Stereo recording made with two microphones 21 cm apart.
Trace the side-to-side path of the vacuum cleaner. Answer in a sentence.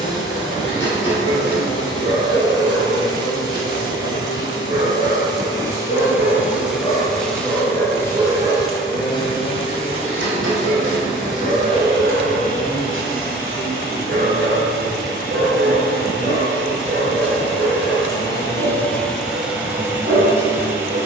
In this clip you hear the vacuum cleaner go left and come back.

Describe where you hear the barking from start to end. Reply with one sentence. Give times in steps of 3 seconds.
You can hear the barking on the left from 0 s, in the centre from 6 s and on the right from 9 s.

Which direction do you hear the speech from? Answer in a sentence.
In this clip you hear the speech on the left.